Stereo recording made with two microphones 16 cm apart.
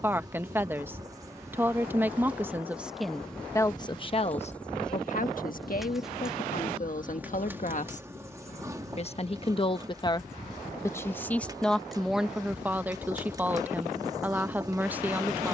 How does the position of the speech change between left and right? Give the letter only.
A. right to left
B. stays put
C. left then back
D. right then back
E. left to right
C.